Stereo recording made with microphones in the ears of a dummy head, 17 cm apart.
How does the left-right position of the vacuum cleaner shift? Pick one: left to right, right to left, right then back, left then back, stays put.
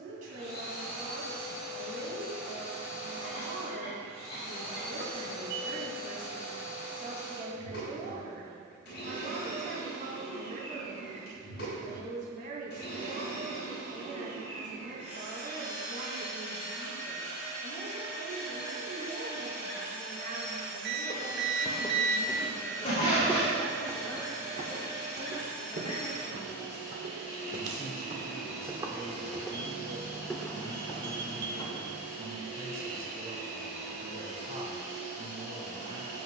stays put.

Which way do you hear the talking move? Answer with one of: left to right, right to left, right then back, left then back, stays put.
left then back.